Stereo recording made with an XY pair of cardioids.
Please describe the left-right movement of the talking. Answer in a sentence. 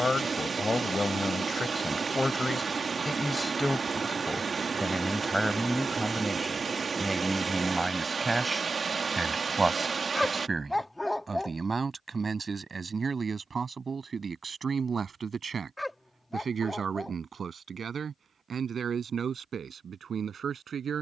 In this clip you hear the talking move from left to right.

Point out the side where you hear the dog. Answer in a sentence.
In this clip you hear the dog in the centre.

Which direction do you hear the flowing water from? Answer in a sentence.
In this clip you hear the flowing water on the right.